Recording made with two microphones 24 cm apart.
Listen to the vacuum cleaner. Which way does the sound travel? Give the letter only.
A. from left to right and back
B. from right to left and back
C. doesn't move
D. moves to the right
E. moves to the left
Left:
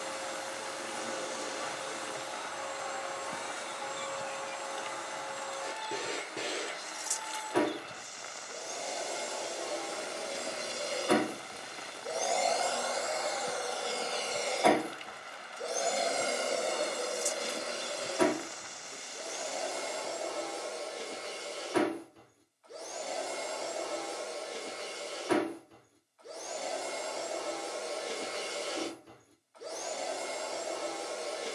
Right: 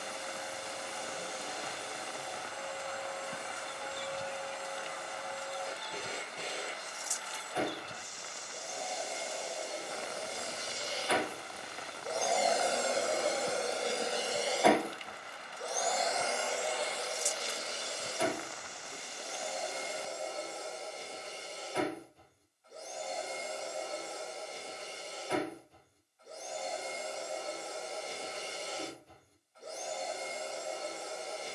A.